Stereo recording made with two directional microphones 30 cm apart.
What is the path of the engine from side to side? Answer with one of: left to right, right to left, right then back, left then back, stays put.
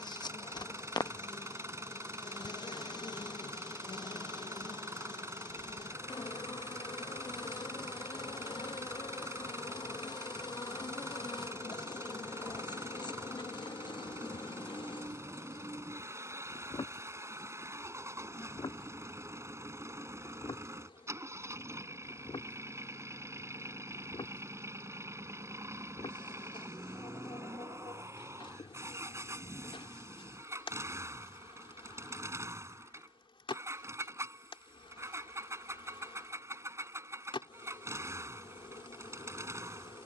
stays put.